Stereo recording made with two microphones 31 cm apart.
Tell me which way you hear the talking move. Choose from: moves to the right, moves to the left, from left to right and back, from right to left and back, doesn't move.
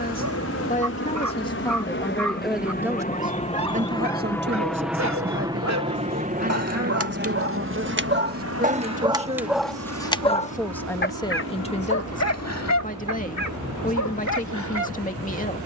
from left to right and back.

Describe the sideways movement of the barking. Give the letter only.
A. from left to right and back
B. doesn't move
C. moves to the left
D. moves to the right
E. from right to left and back
C.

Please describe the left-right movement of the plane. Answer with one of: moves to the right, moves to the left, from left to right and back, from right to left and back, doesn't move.
moves to the right.